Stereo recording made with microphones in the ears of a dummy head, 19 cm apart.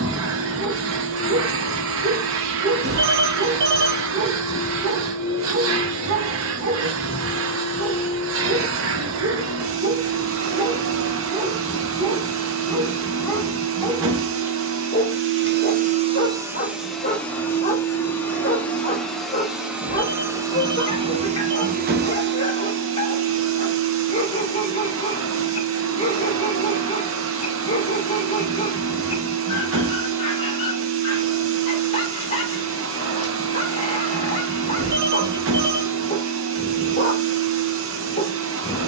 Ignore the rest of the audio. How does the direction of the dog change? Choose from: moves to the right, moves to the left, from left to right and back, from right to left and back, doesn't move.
moves to the left.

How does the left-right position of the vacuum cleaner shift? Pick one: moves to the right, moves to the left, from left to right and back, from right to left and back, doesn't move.
from right to left and back.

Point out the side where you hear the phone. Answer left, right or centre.
right.